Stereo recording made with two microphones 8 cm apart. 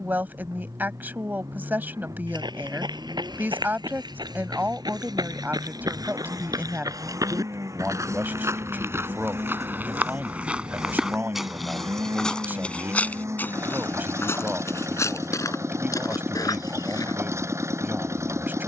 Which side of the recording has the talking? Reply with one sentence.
In this clip you hear the talking on the right.